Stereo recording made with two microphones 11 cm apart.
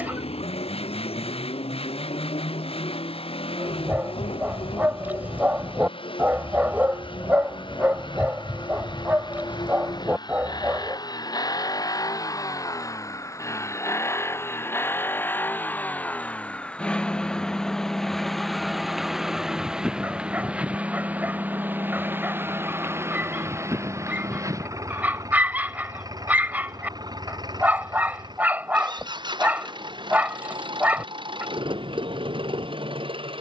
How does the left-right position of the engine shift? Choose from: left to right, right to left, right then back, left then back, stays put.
left to right.